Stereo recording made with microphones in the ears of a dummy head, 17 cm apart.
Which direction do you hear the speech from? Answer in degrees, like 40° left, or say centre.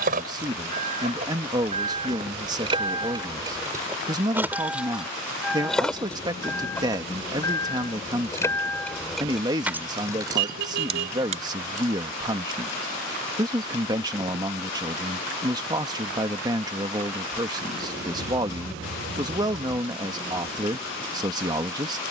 20° right.